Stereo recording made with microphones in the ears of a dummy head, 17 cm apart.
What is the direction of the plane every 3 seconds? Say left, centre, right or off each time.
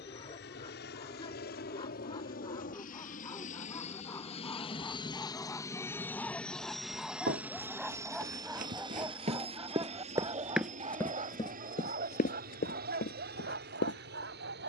left, left, centre, right, right.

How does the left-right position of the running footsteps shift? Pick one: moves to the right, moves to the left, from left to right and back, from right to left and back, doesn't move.
moves to the left.